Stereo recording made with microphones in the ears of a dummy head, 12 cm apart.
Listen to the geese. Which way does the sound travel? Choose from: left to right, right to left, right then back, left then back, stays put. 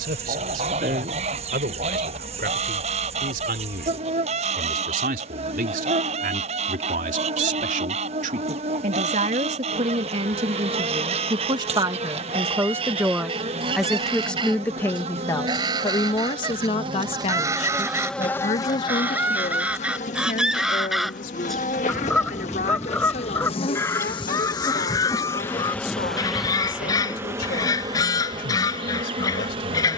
right to left.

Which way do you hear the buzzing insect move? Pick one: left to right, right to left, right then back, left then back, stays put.
left then back.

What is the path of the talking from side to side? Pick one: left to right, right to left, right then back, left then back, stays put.
right to left.